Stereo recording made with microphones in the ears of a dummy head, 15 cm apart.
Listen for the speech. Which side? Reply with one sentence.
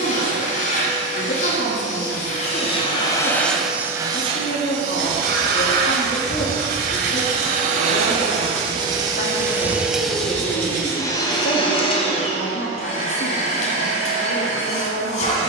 You can hear the speech on the left.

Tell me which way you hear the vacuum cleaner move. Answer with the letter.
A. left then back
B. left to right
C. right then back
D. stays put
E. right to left
C.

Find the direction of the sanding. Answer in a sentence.
You can hear the sanding on the right.